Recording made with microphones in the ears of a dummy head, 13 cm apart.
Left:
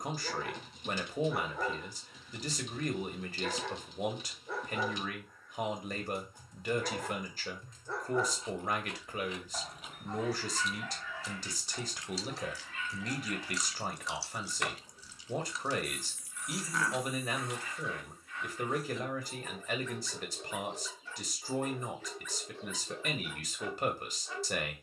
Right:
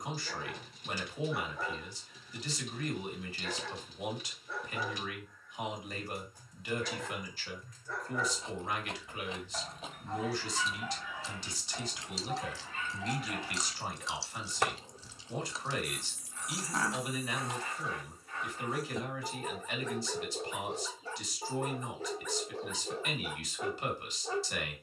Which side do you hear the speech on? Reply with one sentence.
You can hear the speech on the left.